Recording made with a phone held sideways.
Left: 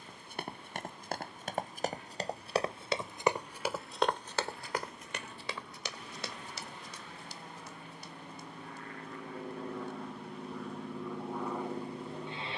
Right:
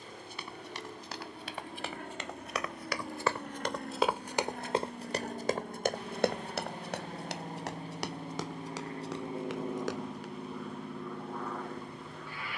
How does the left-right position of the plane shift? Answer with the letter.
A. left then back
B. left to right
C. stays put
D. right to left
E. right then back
D.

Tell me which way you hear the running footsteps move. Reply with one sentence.
In this clip you hear the running footsteps move from left to right.